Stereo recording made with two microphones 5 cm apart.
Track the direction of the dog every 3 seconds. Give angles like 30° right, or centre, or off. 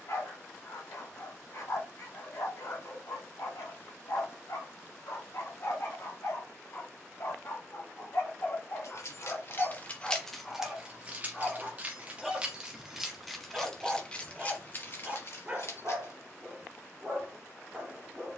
80° left, 70° left, 50° left, 20° left, 10° right, 30° right.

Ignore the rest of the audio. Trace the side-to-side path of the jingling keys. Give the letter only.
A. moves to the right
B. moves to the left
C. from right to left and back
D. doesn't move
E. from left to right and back
E.